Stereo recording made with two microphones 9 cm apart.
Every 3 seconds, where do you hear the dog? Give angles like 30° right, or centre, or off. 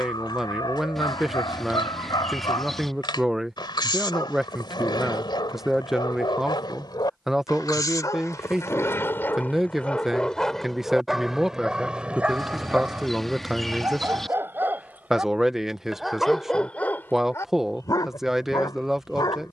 60° left, 60° left, 50° left, 10° left, 20° right, 10° left, 50° left.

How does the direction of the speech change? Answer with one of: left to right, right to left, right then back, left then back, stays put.
stays put.